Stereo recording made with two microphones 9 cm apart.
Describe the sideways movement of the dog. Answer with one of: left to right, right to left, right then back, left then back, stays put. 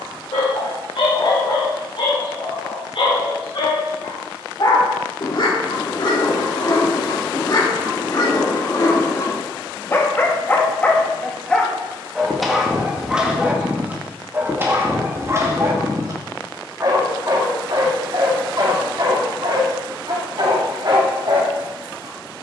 left to right.